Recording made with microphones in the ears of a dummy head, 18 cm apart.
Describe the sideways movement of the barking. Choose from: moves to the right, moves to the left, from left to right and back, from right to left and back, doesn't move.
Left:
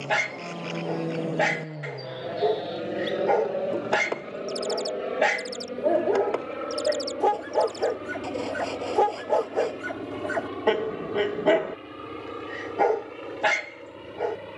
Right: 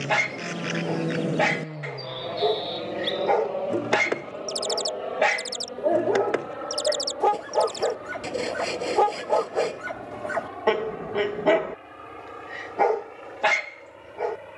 doesn't move.